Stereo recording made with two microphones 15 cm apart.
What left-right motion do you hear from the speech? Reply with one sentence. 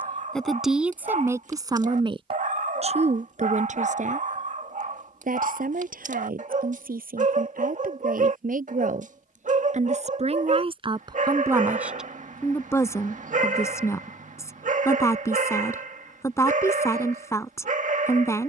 You can hear the speech go right and come back.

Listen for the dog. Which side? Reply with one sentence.
In this clip you hear the dog on the right.